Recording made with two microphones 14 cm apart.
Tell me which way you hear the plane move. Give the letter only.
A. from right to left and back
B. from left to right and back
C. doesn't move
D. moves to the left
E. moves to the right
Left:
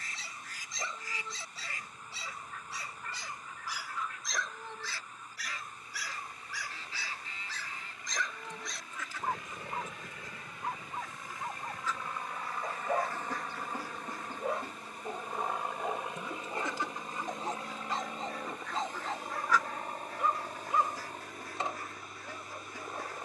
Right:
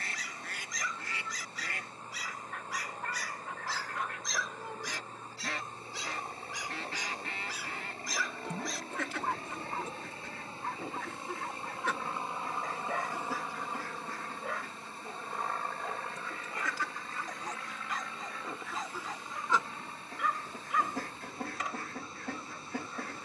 D.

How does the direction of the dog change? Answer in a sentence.
You can hear the dog go right and come back.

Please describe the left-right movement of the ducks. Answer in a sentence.
You can hear the ducks move from right to left and back again.